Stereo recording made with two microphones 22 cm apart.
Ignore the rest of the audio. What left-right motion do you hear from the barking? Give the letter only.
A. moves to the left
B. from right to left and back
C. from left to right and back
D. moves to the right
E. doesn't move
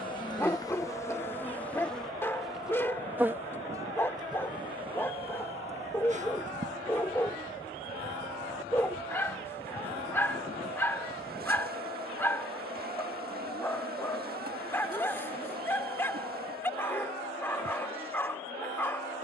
E.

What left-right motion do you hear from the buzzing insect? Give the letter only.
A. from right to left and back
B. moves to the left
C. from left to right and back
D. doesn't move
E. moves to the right
E.